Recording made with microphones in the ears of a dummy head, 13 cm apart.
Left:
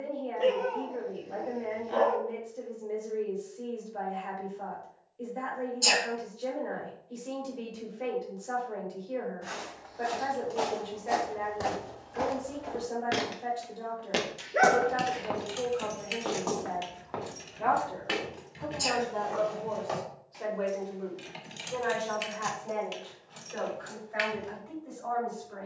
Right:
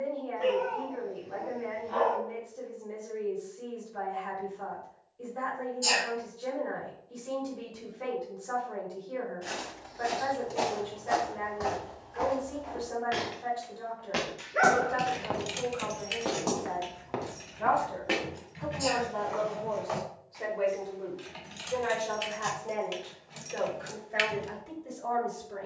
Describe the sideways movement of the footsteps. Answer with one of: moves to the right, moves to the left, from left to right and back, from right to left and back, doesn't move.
from right to left and back.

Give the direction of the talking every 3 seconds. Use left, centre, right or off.
left, left, left, left, left, left, centre, right, right.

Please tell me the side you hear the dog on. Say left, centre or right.
left.